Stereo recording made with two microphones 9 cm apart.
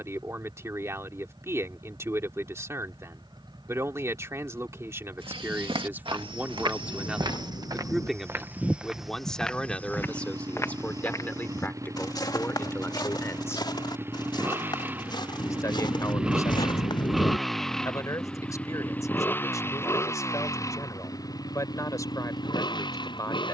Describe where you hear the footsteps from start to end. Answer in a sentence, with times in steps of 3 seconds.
In this clip you hear the footsteps not at all from 0 s, on the right from 3 s, on the left from 9 s and not at all from 18 s.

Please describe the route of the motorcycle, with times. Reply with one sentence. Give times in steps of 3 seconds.
You can hear the motorcycle on the right from 0 s, in the centre from 15 s and on the left from 18 s.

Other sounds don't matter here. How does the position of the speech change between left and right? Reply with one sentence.
You can hear the speech go from the right side to the left.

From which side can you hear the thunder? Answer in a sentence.
In this clip you hear the thunder on the left.